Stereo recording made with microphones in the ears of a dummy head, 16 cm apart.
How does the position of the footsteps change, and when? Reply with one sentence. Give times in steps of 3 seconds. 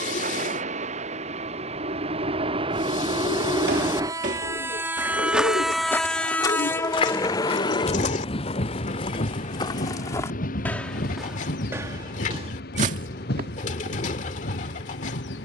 In this clip you hear the footsteps not at all from 0 s, on the right from 3 s, on the left from 6 s, in the centre from 9 s and on the right from 12 s.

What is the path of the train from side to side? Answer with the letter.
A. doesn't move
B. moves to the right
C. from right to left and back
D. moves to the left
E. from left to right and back
D.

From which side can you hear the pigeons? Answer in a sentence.
You can hear the pigeons on the left.